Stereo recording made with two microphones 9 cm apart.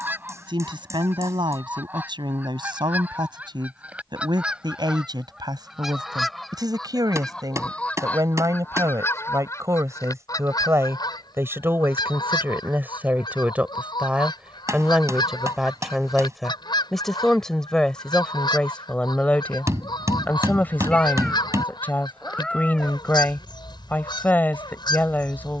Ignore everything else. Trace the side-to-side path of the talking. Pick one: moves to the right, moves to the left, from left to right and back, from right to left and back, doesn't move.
moves to the left.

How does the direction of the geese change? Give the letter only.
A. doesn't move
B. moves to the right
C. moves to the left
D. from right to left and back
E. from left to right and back
C.